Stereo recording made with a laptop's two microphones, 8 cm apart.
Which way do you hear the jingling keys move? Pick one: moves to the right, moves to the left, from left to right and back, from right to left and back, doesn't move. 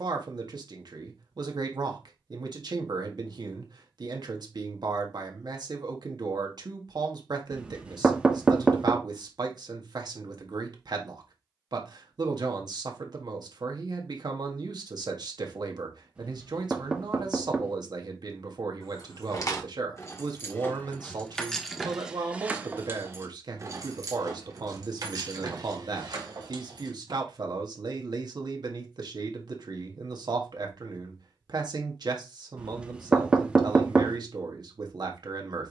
moves to the right.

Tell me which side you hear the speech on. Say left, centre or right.
right.